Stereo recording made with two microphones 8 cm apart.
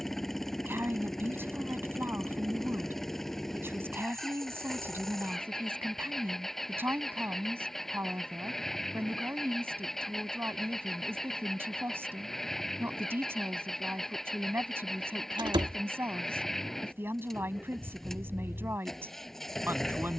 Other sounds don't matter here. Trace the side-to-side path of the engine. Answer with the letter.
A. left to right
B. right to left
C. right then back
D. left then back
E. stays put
E.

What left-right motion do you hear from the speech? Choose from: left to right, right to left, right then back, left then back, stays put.
stays put.